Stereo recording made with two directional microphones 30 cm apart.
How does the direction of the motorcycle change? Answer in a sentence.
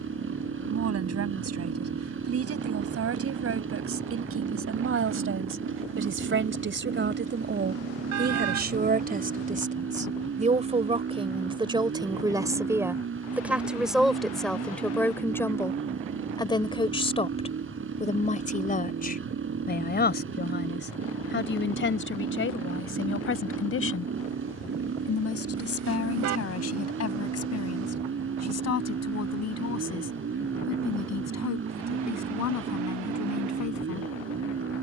In this clip you hear the motorcycle stay in one place.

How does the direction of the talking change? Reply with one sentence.
You can hear the talking go from the right side to the left.